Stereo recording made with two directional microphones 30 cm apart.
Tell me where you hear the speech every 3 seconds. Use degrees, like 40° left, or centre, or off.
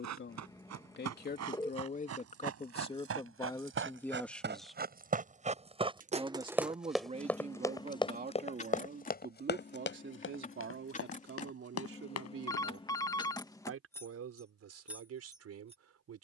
30° left, 10° left, 20° right, 40° right, 50° right, 60° right.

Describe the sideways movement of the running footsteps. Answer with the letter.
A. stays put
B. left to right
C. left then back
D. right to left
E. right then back
D.